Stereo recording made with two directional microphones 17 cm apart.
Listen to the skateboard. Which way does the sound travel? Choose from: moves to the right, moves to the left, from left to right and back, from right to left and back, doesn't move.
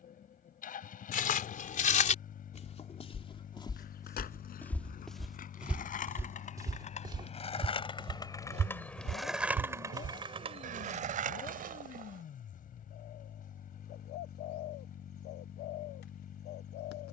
moves to the right.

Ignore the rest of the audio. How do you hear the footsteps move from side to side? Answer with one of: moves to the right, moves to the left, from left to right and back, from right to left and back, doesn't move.
moves to the right.